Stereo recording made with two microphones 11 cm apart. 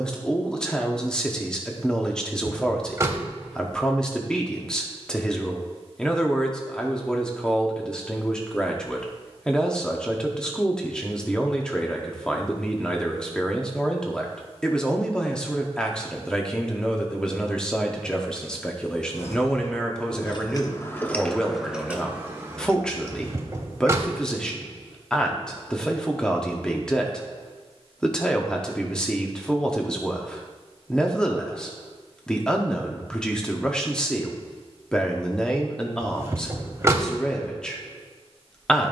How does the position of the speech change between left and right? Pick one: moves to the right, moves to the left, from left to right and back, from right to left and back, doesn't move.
doesn't move.